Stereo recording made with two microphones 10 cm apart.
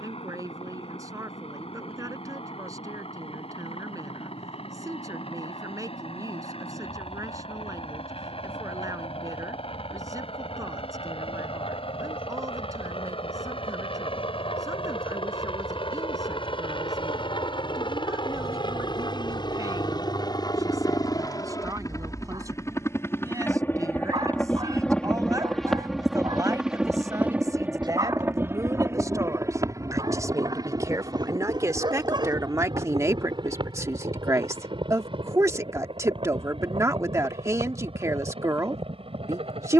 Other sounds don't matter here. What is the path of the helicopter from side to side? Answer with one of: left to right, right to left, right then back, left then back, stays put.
left to right.